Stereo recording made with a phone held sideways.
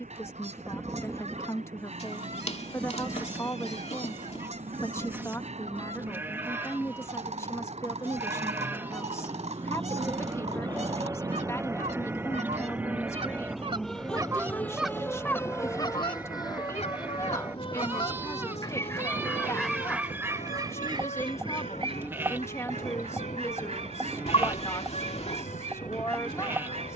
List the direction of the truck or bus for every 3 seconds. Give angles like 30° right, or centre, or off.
70° right, 70° right, 50° right, 30° right, centre, 30° left, 50° left, 60° left, 60° left.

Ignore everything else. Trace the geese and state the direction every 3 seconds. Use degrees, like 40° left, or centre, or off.
60° right, 60° right, 60° right, 60° right, 40° right, 40° left, centre, 50° right, 50° right.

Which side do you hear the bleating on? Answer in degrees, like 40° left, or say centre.
20° right.